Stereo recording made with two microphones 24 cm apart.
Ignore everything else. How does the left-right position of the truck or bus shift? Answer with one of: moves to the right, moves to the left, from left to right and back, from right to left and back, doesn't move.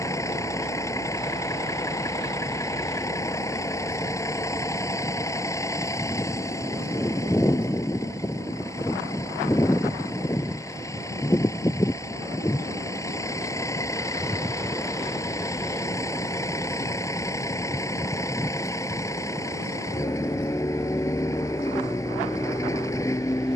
doesn't move.